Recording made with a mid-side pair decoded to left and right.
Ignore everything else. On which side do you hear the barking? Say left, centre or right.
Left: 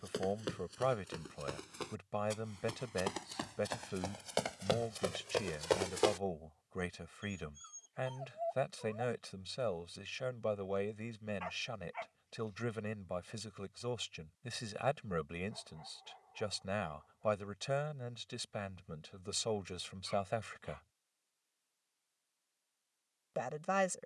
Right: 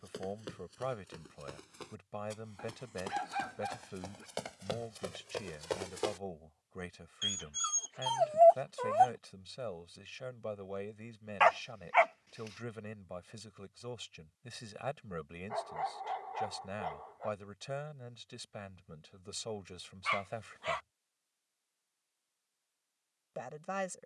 right.